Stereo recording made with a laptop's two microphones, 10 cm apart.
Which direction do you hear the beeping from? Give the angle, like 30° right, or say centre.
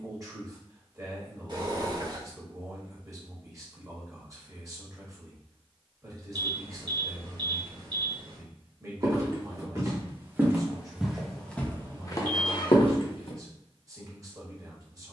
50° right.